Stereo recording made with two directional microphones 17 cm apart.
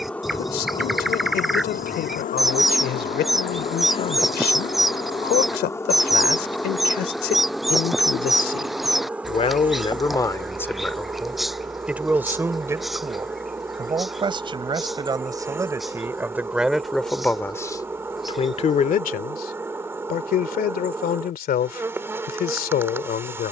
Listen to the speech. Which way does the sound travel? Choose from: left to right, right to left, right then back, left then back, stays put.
right then back.